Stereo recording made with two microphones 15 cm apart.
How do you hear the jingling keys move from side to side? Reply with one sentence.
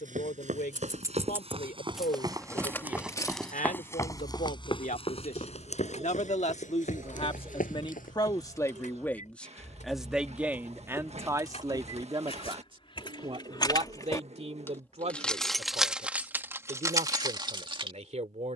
In this clip you hear the jingling keys move from right to left and back again.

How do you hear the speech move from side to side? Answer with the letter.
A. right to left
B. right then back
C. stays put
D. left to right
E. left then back
D.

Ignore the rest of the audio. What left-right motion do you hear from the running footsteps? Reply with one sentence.
In this clip you hear the running footsteps go from the right side to the left.